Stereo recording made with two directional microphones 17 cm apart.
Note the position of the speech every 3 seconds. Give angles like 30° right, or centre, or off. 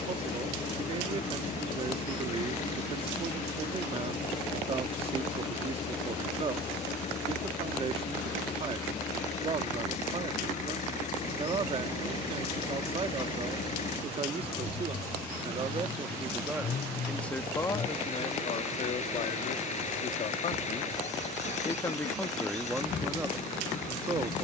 30° right, 30° right, 30° right, 30° right, 30° right, 10° right, 40° left, centre.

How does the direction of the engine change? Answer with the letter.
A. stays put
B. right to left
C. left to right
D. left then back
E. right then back
A.